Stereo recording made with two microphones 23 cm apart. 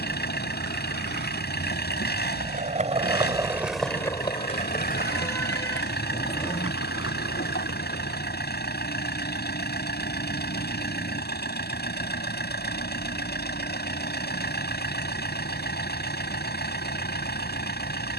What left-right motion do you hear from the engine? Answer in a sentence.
You can hear the engine stay in one place.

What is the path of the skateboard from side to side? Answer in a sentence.
In this clip you hear the skateboard travel towards the left.